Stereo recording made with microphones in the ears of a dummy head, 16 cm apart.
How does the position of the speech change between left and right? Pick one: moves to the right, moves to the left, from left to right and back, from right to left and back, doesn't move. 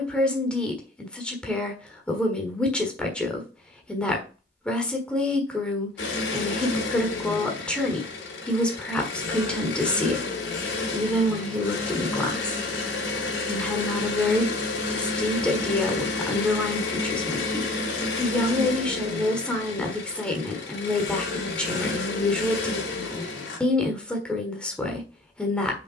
doesn't move.